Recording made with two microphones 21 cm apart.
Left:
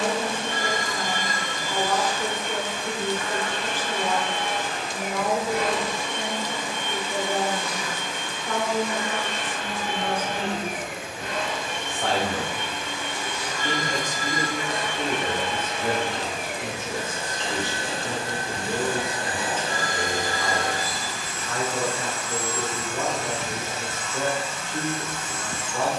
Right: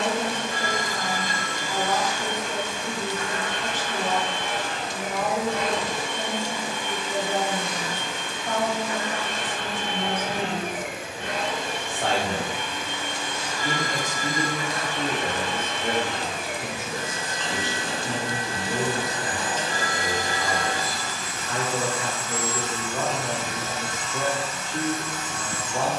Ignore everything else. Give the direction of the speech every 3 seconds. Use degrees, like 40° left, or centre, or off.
40° right, 40° right, 40° right, 40° right, 10° right, centre, 40° right, 40° right, 40° right.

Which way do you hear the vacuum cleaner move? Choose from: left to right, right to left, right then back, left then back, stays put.
right then back.